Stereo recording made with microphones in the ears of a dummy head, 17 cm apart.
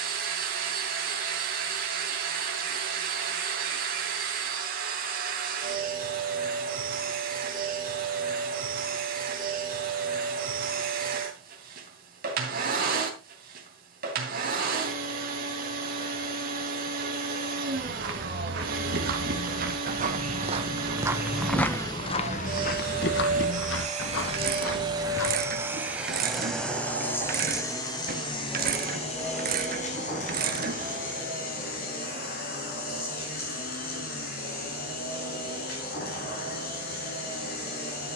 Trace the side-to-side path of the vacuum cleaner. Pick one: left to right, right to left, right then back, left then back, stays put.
right to left.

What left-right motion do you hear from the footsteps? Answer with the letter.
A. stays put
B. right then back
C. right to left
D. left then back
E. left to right
C.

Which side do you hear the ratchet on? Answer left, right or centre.
right.